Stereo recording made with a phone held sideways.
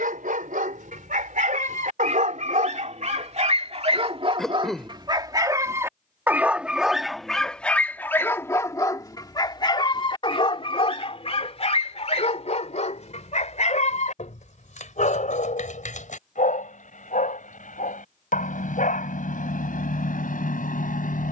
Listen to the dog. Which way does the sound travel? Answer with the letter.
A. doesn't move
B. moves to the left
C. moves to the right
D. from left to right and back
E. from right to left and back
B.